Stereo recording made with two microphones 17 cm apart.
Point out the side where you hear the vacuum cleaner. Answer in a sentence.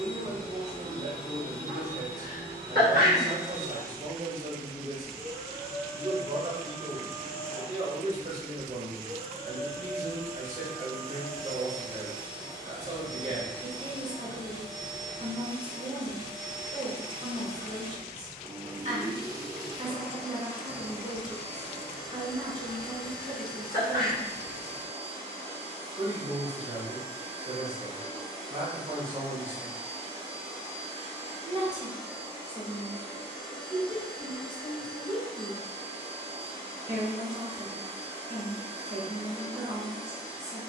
You can hear the vacuum cleaner on the right.